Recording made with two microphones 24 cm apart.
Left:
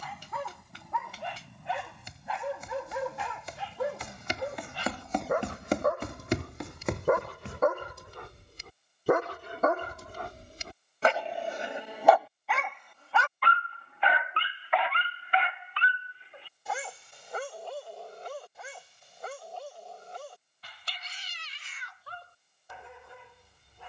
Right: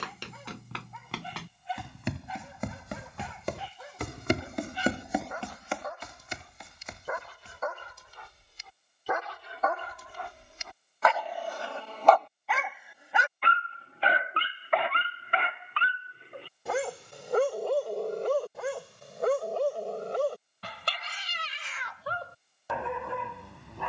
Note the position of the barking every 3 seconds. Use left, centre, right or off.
left, left, left, left, right, right, right, right.